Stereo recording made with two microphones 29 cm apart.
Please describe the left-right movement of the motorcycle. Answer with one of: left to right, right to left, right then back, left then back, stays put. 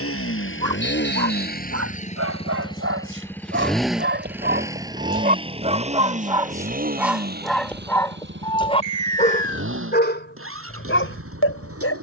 left to right.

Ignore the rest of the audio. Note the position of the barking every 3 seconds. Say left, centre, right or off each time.
right, right, centre, left.